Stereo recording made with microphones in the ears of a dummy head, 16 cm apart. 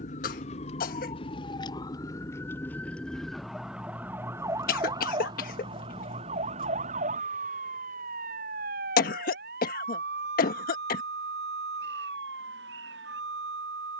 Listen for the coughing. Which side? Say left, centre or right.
left.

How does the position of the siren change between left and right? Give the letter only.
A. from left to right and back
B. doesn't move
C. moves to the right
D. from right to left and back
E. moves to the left
C.